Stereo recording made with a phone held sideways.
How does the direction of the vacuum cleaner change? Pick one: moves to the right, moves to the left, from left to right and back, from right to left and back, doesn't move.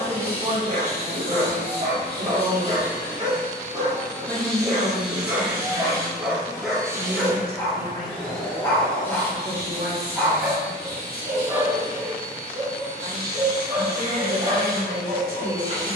from left to right and back.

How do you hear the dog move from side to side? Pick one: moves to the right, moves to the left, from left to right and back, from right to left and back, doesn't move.
from right to left and back.